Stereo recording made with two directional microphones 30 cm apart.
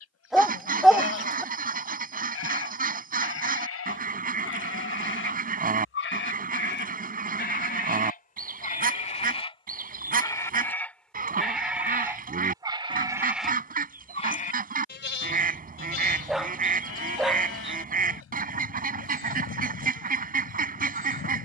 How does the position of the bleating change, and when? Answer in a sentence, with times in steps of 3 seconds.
You can hear the bleating on the left from 0 s, in the centre from 9 s and on the left from 15 s.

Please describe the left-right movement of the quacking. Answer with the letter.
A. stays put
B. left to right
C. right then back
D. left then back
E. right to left
A.